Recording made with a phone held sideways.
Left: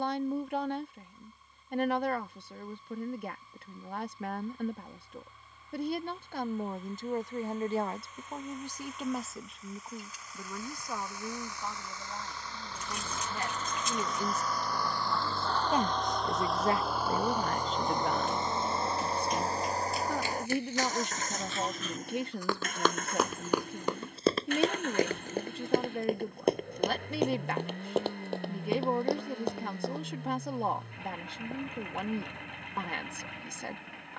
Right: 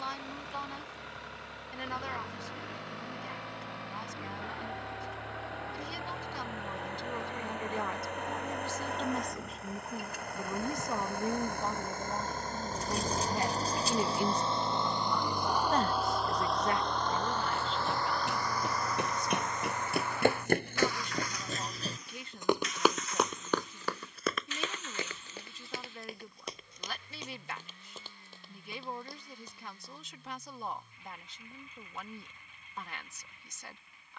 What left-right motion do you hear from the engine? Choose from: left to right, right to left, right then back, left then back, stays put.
right to left.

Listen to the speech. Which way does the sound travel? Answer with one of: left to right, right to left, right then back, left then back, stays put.
right then back.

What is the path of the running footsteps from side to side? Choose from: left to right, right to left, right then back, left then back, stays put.
right to left.